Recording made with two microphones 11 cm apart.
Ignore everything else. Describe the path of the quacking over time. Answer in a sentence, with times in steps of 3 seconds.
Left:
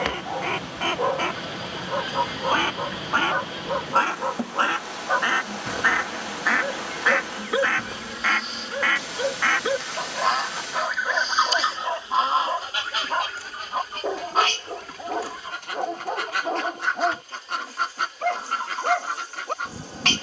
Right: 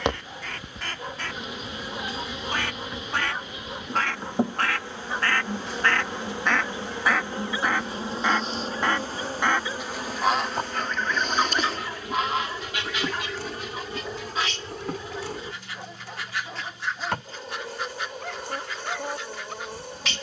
In this clip you hear the quacking on the left from 0 s, in the centre from 6 s and on the left from 12 s.